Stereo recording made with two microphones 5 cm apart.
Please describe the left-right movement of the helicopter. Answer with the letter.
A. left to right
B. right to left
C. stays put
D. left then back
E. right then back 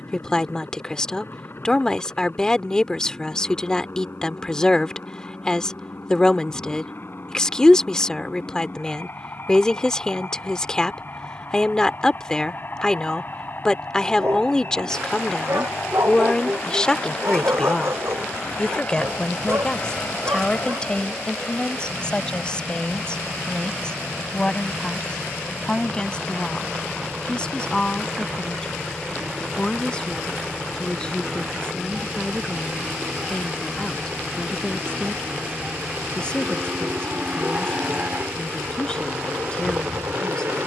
A.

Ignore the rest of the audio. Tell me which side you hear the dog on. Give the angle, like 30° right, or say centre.
60° right.